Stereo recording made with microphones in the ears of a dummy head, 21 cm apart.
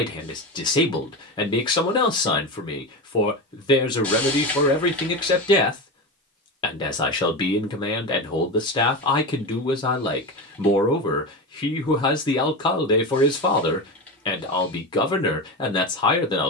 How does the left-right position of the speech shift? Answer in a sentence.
You can hear the speech stay put.